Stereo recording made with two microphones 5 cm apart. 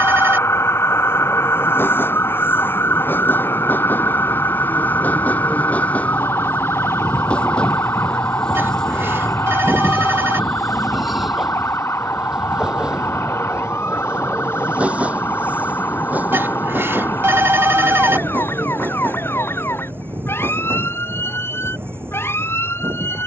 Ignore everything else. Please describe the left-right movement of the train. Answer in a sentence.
You can hear the train move to the right.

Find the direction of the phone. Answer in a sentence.
You can hear the phone on the right.